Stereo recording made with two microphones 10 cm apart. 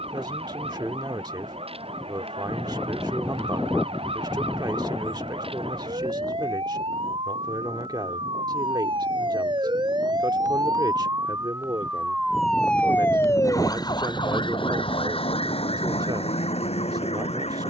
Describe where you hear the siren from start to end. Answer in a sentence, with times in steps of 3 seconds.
You can hear the siren on the right from 0 s and on the left from 12 s.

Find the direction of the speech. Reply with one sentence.
In this clip you hear the speech on the right.